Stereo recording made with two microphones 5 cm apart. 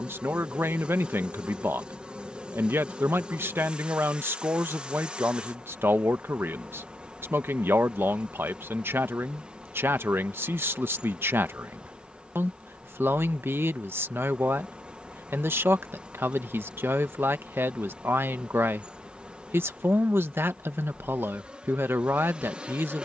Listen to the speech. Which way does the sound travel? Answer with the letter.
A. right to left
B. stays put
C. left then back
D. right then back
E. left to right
B.